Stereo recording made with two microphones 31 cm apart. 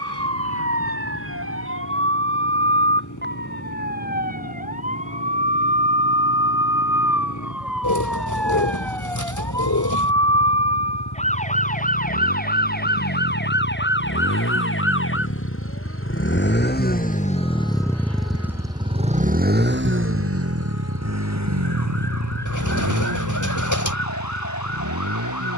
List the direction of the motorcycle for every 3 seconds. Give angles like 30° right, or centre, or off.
80° left, 70° left, 70° left, 70° left, 60° left, 30° left, 30° right, 70° right, 80° right.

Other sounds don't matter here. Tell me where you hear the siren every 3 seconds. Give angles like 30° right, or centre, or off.
40° right, 30° right, centre, 20° left, 30° left, 40° left, 50° left, 60° left, 60° left.